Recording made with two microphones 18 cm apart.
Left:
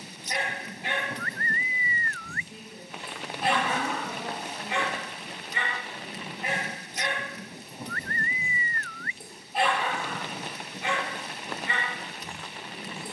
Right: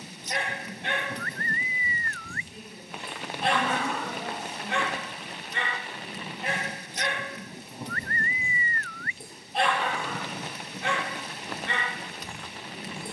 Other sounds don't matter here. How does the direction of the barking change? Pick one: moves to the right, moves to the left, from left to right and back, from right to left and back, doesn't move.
doesn't move.